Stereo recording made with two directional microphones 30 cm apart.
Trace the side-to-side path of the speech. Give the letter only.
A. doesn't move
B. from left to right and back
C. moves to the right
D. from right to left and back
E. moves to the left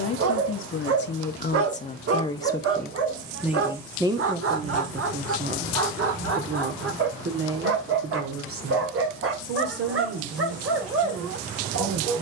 C.